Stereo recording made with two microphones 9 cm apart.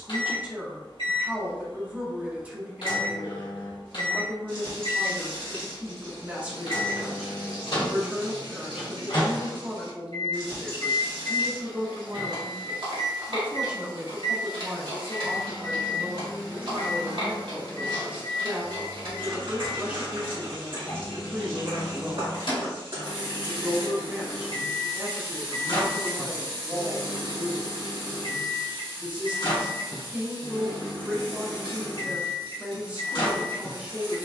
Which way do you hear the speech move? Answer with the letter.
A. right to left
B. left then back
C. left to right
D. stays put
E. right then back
D.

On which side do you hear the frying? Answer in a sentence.
In this clip you hear the frying on the right.